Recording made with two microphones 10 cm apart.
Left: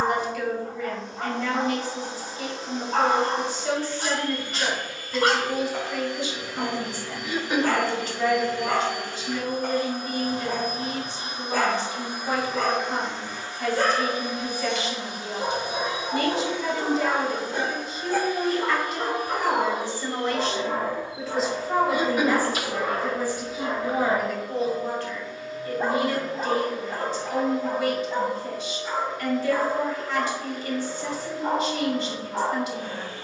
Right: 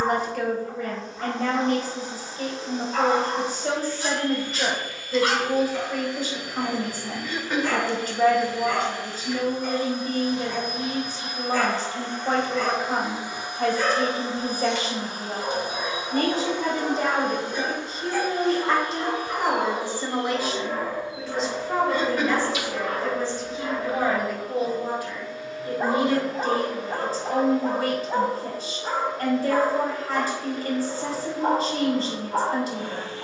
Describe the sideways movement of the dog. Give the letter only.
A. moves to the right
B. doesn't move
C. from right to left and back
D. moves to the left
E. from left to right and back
A.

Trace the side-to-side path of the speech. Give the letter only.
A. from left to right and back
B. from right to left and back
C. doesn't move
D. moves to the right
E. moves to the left
B.